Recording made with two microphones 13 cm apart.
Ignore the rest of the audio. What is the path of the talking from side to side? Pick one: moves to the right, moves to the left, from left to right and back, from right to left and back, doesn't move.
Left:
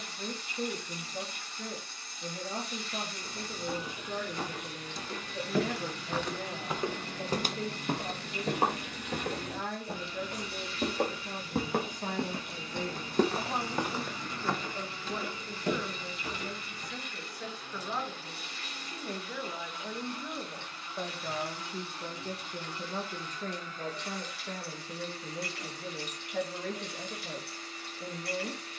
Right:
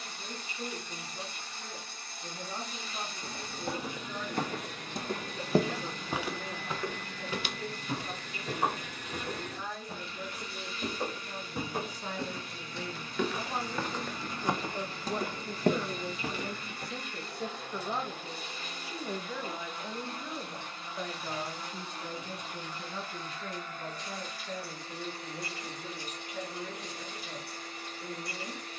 from left to right and back.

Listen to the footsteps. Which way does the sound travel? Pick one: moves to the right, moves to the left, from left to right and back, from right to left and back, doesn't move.
from right to left and back.